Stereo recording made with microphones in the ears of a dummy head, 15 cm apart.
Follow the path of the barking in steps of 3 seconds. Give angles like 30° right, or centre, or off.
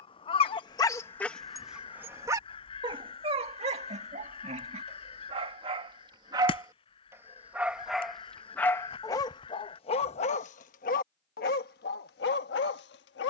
centre, 30° right, centre, 40° left, 70° left.